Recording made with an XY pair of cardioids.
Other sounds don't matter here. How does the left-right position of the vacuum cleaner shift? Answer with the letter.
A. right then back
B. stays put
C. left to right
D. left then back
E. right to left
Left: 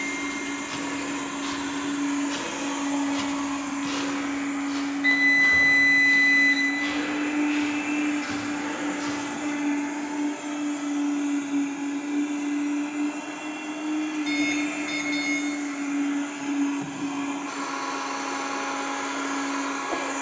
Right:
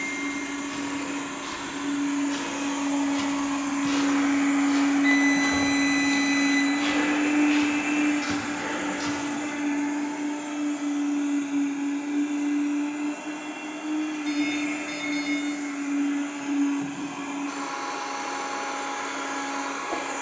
A.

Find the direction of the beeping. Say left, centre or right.
left.